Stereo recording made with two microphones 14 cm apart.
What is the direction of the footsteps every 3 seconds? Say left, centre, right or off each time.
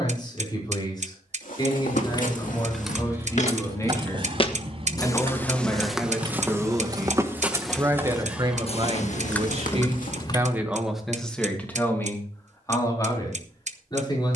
left, left, centre, left, off.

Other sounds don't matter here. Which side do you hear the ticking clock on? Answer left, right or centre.
right.